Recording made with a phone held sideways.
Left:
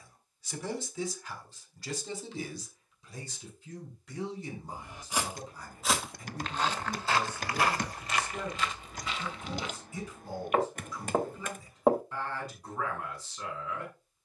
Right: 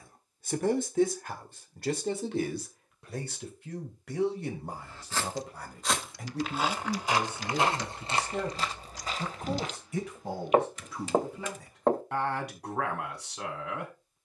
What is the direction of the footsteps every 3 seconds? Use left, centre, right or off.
off, centre, right, right, off.